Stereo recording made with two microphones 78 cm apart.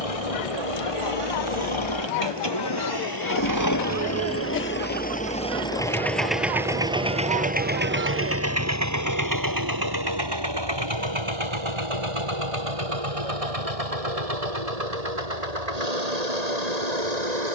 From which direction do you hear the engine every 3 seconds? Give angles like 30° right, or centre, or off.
40° left, 20° left, 10° right, 30° right, 40° right, 50° right.